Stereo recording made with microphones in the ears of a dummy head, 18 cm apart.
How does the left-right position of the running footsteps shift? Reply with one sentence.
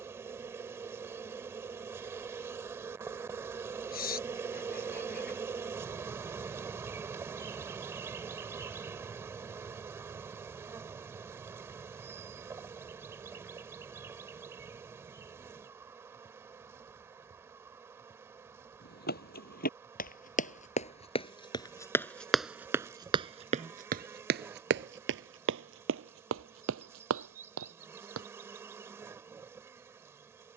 You can hear the running footsteps move to the right.